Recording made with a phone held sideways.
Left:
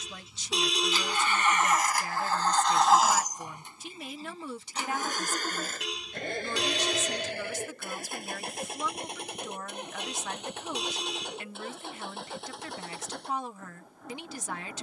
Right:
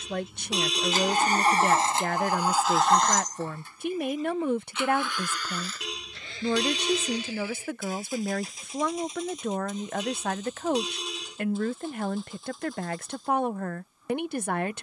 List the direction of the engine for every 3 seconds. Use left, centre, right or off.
right, left, left, left, left.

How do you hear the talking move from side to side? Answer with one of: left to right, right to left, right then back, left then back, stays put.
stays put.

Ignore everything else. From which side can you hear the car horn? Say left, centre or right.
centre.